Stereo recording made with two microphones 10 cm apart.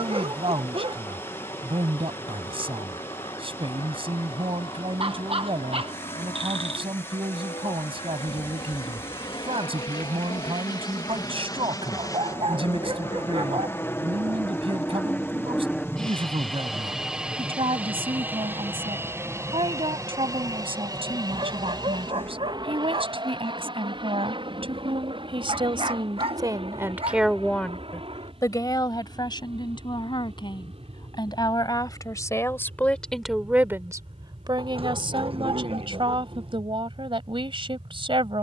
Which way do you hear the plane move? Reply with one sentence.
In this clip you hear the plane move to the right.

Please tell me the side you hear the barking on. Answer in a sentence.
In this clip you hear the barking on the right.